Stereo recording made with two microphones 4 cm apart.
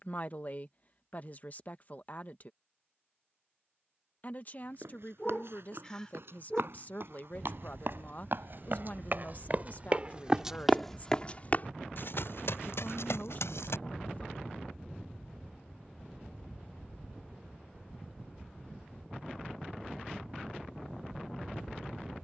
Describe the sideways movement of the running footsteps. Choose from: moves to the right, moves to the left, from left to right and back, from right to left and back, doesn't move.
moves to the left.